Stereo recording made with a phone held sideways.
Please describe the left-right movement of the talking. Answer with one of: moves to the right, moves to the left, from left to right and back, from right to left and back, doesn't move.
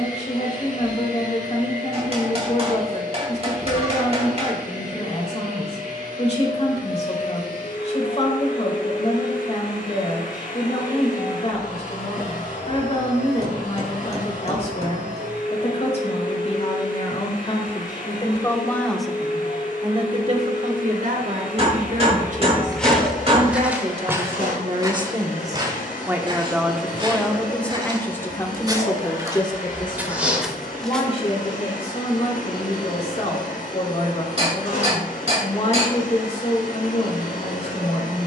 from left to right and back.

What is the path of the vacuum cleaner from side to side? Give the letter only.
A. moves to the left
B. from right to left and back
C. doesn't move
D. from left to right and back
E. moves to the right
C.